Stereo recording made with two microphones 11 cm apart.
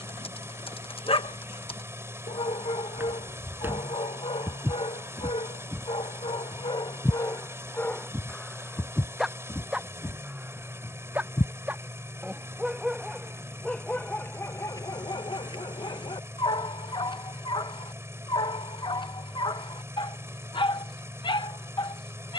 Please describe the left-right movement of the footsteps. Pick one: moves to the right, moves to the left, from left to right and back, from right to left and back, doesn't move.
moves to the left.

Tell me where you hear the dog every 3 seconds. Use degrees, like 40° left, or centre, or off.
60° left, 60° left, 30° left, 10° right, 10° left, 50° left, 50° left, 50° left.